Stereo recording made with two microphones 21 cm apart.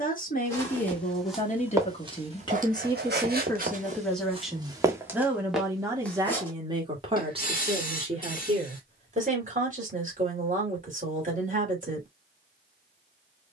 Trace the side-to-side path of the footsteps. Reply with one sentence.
In this clip you hear the footsteps move from left to right and back again.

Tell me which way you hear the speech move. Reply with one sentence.
In this clip you hear the speech move to the right.